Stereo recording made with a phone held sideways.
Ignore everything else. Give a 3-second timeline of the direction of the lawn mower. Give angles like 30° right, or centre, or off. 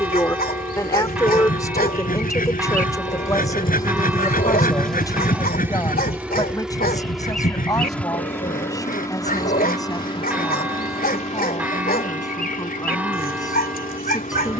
60° left, 10° left, centre, 40° left, 60° left.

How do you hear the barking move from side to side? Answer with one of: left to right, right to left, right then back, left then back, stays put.
stays put.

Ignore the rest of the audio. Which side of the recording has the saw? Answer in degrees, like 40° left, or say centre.
60° left.